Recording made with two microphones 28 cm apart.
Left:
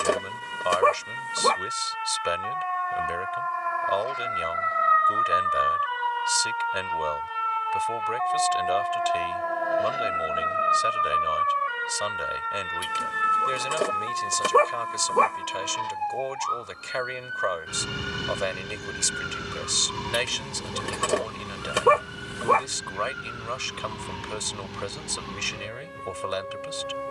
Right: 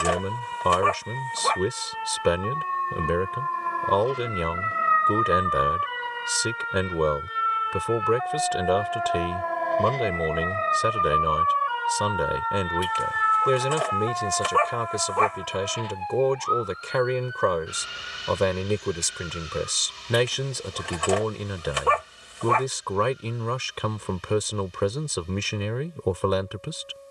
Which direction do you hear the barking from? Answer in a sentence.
You can hear the barking on the left.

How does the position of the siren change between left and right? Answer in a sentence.
In this clip you hear the siren move from right to left.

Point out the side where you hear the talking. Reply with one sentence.
You can hear the talking on the right.